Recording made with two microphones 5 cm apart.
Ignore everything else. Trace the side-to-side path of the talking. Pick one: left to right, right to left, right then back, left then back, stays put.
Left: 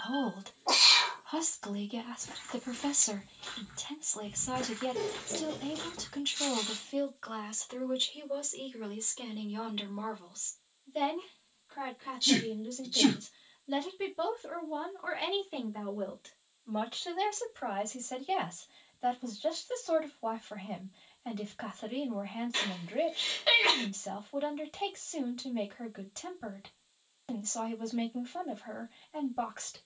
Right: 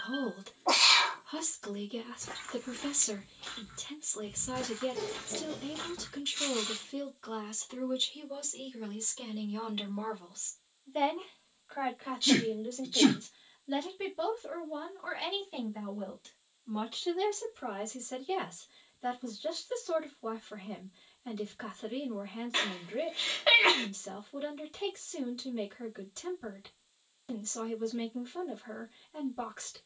right then back.